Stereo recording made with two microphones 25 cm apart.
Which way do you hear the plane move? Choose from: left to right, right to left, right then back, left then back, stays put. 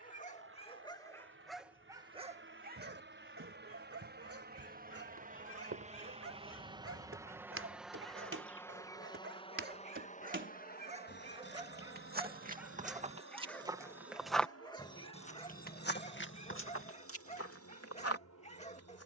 right to left.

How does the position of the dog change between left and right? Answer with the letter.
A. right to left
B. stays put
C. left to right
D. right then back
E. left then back
D.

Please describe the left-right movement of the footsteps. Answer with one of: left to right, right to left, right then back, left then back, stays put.
right to left.